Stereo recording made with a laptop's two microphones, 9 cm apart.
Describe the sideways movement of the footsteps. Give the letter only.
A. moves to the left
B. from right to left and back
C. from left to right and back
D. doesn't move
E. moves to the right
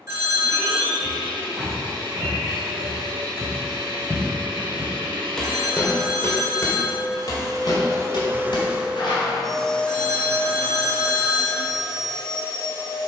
A.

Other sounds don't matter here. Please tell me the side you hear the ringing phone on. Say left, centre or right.
right.